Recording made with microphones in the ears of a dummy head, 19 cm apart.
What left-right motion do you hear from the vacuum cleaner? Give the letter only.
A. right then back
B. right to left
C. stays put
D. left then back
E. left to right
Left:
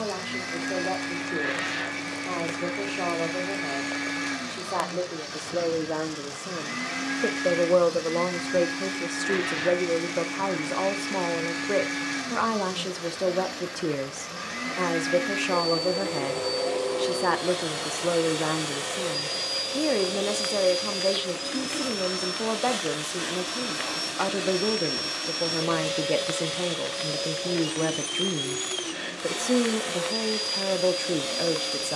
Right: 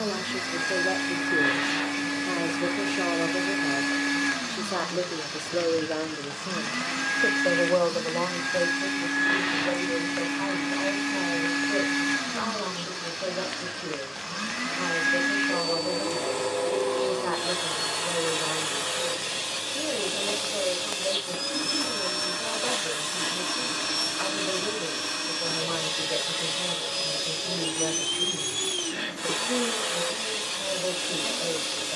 C.